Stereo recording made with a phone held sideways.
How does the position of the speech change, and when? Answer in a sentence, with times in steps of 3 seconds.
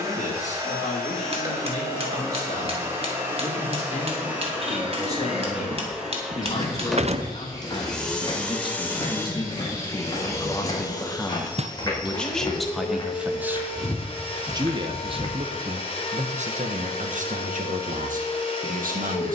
You can hear the speech on the left from 0 s, in the centre from 12 s and on the right from 15 s.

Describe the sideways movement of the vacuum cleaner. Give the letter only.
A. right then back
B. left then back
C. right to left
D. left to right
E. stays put
C.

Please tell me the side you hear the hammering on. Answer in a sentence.
You can hear the hammering on the right.